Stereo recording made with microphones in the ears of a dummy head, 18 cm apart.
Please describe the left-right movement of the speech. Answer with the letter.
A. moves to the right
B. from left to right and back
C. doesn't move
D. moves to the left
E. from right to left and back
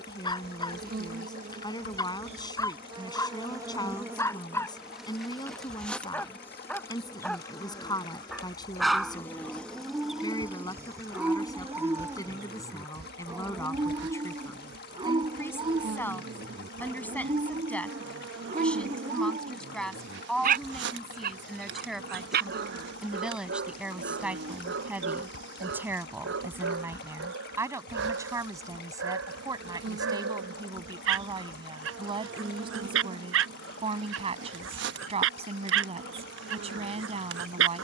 A.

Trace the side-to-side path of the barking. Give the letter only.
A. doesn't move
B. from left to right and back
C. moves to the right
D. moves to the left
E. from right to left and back
C.